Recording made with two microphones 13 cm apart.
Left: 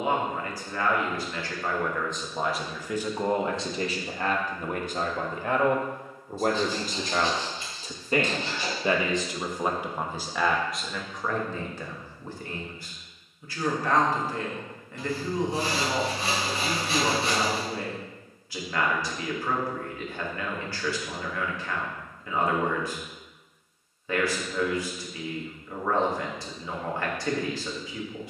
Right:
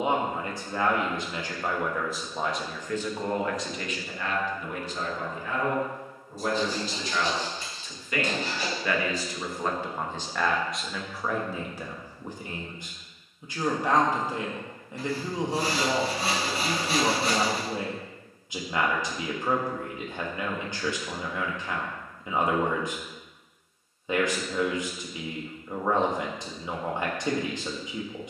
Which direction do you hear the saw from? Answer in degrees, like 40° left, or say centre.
40° right.